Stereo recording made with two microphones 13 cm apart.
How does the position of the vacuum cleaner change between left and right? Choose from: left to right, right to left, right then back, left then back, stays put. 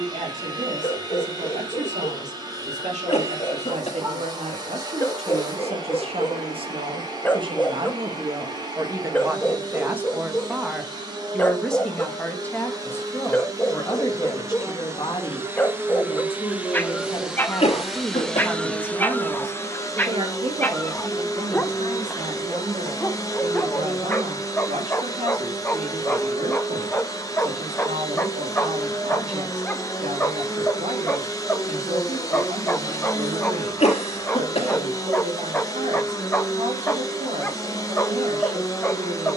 right to left.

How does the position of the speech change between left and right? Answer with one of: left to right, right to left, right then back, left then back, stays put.
left then back.